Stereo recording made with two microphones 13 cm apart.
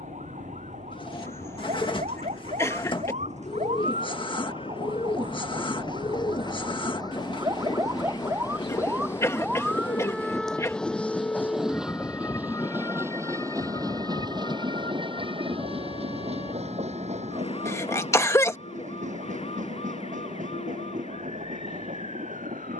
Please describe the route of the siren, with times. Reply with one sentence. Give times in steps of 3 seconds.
In this clip you hear the siren on the right from 0 s, in the centre from 9 s and on the left from 12 s.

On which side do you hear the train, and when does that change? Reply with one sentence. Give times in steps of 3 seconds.
In this clip you hear the train on the left from 0 s, in the centre from 9 s and on the right from 12 s.